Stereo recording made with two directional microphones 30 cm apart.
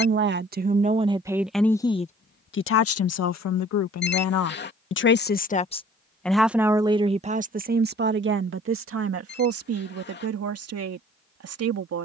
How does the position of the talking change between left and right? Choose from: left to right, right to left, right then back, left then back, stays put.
left then back.